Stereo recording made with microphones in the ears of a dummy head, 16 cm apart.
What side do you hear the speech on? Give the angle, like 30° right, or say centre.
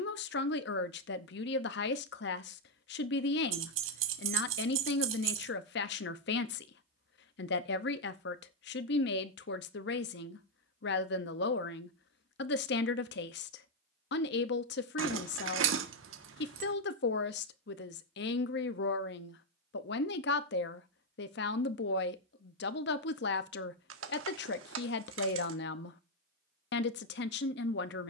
70° left.